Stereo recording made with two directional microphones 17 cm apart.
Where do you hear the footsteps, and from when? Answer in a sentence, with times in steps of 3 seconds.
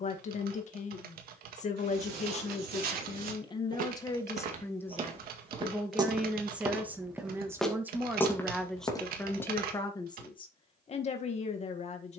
In this clip you hear the footsteps on the right from 0 s, in the centre from 6 s and on the left from 9 s.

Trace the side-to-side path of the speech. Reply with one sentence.
You can hear the speech go right and come back.